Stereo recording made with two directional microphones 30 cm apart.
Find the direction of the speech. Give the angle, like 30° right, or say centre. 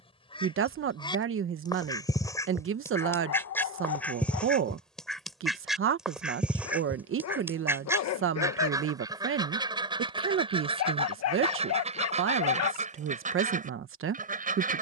40° right.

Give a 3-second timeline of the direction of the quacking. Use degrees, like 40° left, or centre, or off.
10° left, centre, 10° right, 20° right, 20° right.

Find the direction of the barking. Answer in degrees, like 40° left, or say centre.
60° left.